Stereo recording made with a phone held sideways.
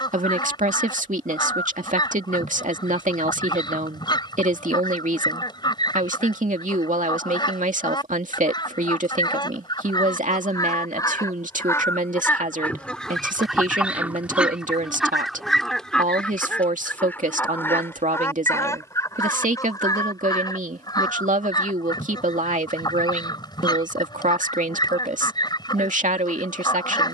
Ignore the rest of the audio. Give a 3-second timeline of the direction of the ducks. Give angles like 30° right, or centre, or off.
30° left, 30° left, 30° left, 30° left, centre, 10° left, 20° left, 30° left, 30° left.